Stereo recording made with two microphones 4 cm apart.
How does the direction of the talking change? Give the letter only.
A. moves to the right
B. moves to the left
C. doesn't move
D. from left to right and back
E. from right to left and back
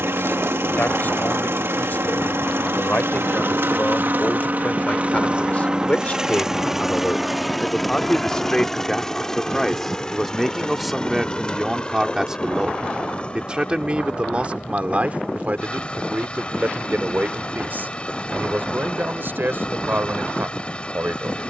A.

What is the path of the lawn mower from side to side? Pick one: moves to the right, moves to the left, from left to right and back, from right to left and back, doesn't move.
moves to the left.